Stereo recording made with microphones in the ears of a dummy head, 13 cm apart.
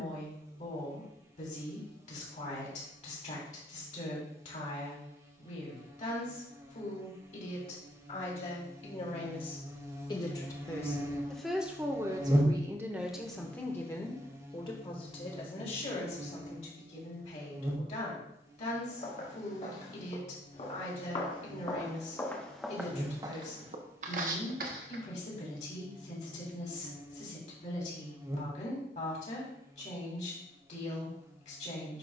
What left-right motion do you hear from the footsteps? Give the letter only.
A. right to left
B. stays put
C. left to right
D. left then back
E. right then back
C.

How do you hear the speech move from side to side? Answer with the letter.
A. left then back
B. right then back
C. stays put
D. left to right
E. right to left
B.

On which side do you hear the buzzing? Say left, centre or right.
right.